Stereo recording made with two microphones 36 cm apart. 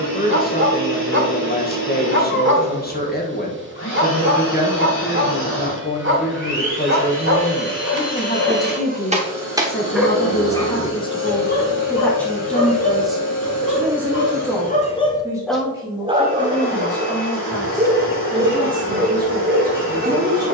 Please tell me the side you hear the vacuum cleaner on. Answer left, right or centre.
left.